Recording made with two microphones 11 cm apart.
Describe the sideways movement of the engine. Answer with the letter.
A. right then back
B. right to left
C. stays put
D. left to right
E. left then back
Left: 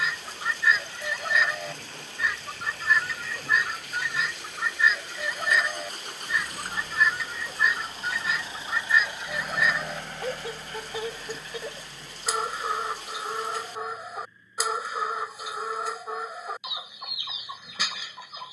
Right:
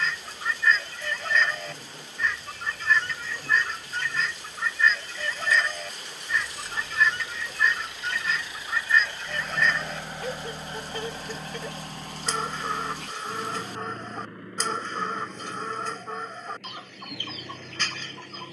D.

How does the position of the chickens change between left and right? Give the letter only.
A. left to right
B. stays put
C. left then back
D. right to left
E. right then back
B.